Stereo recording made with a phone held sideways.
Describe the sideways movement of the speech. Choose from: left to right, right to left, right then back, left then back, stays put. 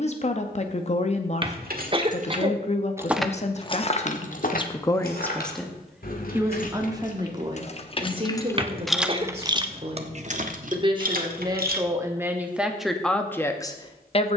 right then back.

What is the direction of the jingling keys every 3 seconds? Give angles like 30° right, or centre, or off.
60° right, 40° left, 40° left, 50° right, off.